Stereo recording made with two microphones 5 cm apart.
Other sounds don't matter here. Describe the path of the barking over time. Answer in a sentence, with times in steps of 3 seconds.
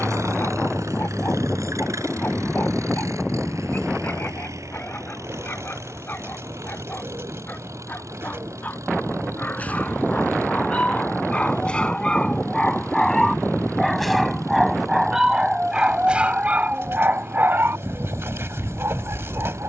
In this clip you hear the barking on the left from 0 s, in the centre from 12 s and on the right from 15 s.